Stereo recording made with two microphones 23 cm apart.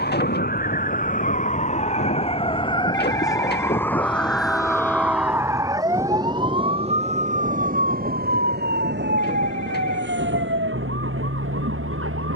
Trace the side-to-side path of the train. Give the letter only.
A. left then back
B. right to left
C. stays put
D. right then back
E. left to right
E.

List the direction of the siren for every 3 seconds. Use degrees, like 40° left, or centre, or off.
30° left, centre, 30° right, 50° right.